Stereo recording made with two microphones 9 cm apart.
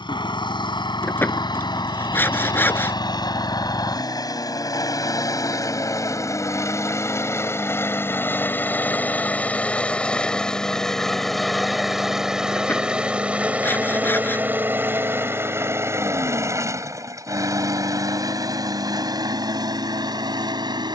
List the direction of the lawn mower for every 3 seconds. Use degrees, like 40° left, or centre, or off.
50° left, 40° left, 30° left, 10° left, 10° right, 30° right, 50° right.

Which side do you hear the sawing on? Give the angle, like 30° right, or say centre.
20° left.